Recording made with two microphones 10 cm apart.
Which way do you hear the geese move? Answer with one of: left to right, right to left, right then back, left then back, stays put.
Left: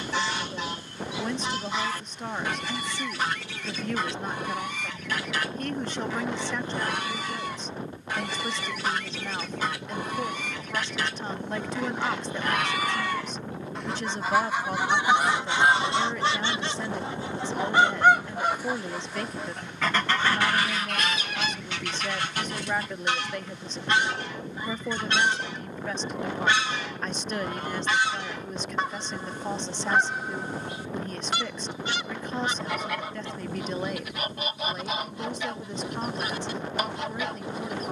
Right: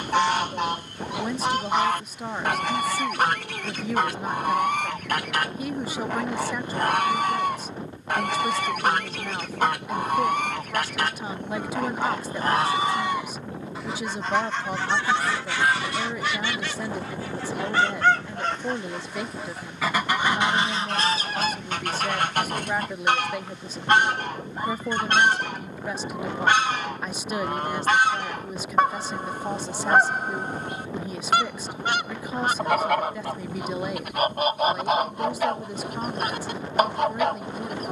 left then back.